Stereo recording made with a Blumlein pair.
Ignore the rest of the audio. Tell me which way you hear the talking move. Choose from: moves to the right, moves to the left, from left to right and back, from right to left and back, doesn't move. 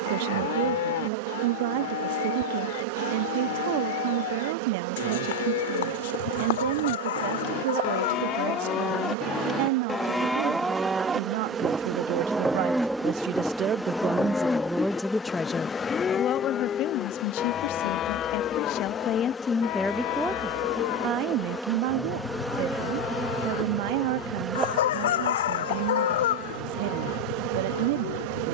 from right to left and back.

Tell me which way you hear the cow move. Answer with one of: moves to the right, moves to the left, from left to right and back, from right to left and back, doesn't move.
from left to right and back.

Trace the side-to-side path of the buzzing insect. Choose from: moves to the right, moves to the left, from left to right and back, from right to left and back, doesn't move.
from right to left and back.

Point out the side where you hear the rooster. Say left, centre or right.
left.